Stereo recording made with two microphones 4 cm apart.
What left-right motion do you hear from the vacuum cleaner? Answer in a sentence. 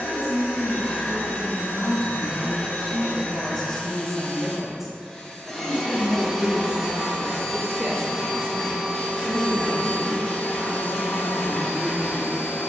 In this clip you hear the vacuum cleaner go right and come back.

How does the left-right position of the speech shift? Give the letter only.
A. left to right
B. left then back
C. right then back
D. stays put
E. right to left
A.